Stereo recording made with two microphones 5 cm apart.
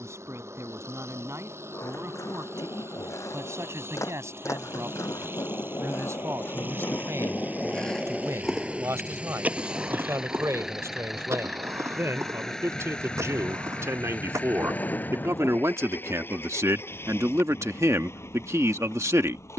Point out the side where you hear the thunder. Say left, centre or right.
left.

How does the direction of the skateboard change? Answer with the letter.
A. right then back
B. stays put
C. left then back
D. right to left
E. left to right
E.